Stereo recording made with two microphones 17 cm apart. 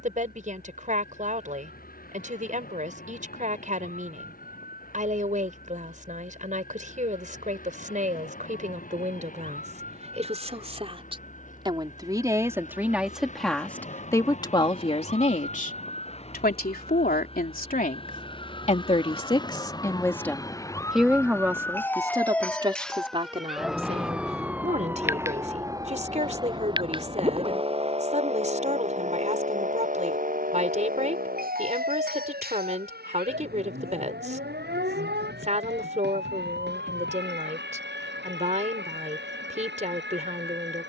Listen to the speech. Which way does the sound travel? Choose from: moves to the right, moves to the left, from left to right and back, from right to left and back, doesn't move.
from right to left and back.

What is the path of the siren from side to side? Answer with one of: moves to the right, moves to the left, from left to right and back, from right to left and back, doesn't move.
moves to the right.